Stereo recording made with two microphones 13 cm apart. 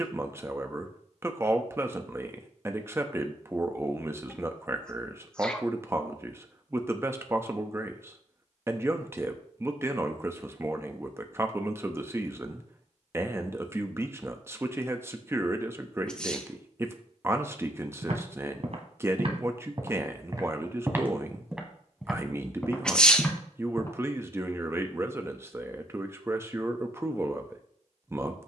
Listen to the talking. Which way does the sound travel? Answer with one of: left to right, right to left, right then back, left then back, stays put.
stays put.